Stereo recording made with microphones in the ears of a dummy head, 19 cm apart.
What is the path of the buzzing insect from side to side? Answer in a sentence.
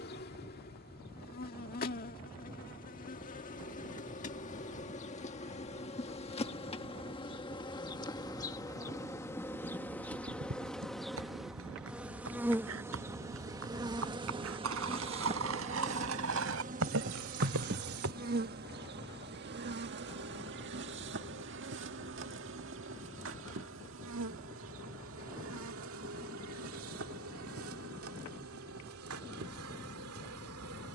You can hear the buzzing insect move from left to right.